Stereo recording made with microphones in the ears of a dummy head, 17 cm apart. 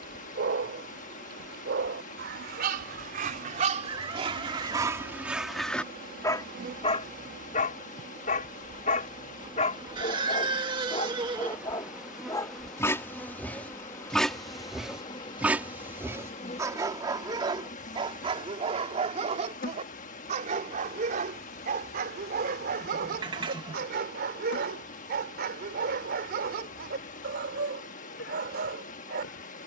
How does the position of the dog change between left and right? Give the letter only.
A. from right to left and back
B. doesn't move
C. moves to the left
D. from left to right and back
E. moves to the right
A.